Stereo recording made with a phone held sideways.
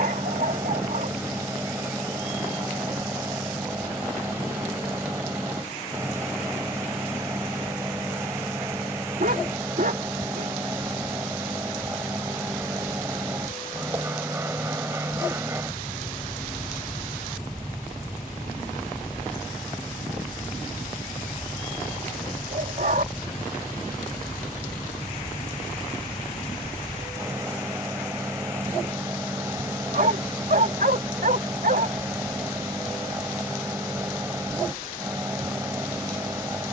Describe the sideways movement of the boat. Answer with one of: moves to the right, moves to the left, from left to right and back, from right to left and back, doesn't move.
doesn't move.